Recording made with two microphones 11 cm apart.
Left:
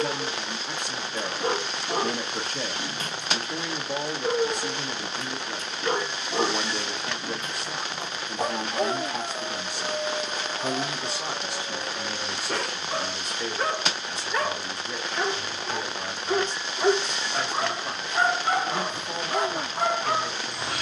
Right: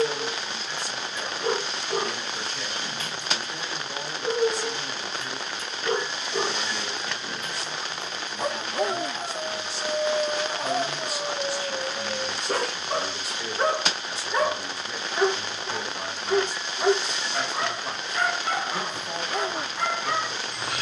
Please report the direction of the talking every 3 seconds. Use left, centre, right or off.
left, left, left, left, centre, centre, centre.